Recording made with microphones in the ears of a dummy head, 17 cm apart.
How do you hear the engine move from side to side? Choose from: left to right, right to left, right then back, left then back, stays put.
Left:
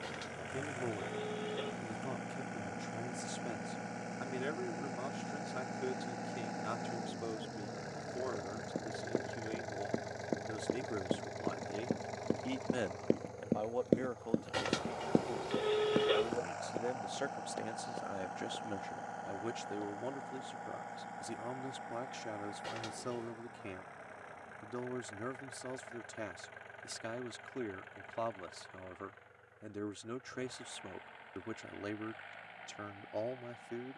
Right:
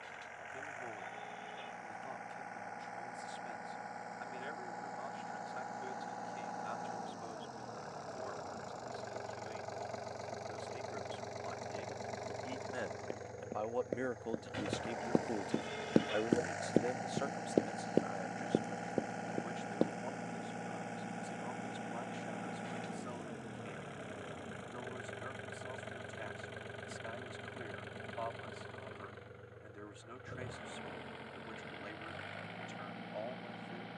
left to right.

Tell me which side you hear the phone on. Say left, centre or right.
left.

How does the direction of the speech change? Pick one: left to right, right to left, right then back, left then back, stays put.
right then back.